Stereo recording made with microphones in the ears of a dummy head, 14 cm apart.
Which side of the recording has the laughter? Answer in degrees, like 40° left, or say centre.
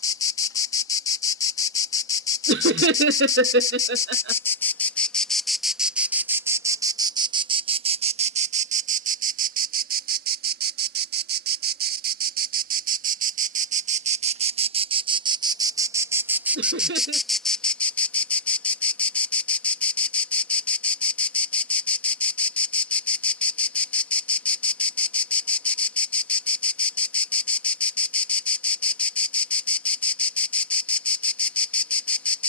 80° right.